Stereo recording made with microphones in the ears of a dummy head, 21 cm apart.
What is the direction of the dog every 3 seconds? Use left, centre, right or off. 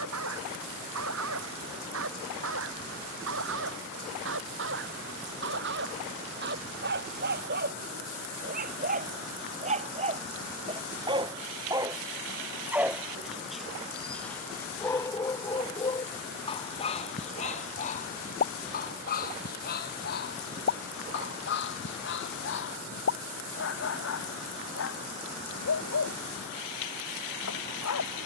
right, right, right, right, centre, left, left, left, left, left.